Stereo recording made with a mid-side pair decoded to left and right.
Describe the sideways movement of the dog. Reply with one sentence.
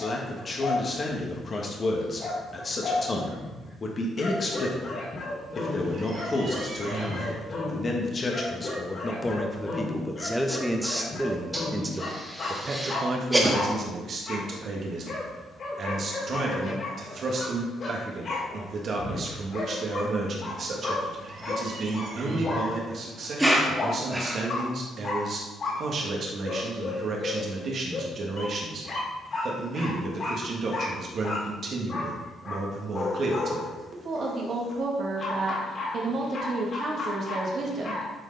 You can hear the dog stay put.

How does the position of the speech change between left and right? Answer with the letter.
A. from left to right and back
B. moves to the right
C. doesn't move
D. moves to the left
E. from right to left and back
B.